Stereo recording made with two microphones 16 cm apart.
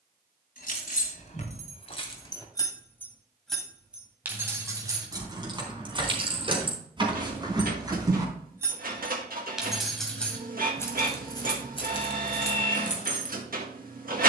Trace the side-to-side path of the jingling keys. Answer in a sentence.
You can hear the jingling keys move from left to right and back again.